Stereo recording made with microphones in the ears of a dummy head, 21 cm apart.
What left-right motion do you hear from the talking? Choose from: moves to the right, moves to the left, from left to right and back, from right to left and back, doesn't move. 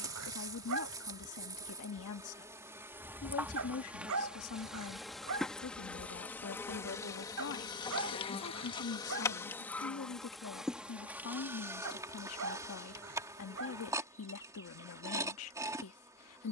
doesn't move.